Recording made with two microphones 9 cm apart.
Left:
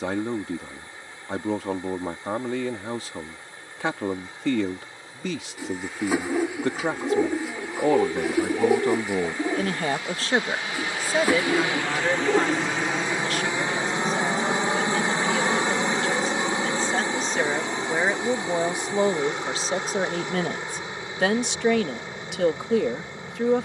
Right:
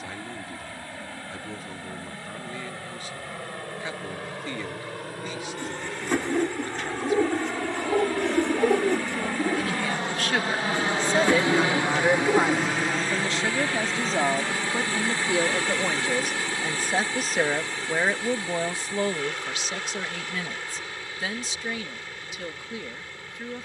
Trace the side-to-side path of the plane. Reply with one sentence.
In this clip you hear the plane move to the left.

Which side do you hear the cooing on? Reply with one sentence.
In this clip you hear the cooing in the centre.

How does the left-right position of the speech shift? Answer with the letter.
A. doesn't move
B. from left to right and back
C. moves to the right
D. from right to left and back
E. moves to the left
B.